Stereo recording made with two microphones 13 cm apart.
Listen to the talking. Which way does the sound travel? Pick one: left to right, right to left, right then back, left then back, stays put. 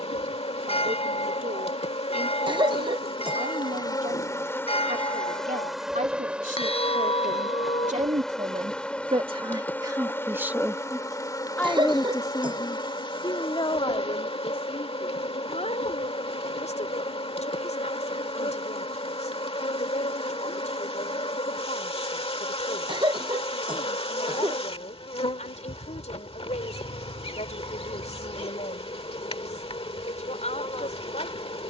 right to left.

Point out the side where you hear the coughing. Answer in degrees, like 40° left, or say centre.
40° right.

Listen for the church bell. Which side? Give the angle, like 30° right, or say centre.
40° left.